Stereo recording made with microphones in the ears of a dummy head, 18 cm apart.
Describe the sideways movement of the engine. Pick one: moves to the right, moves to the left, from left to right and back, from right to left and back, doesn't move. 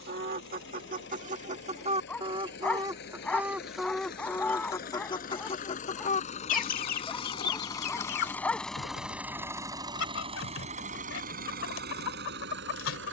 moves to the right.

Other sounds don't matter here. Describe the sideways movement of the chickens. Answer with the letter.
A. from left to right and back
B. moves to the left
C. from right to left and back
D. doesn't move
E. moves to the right
B.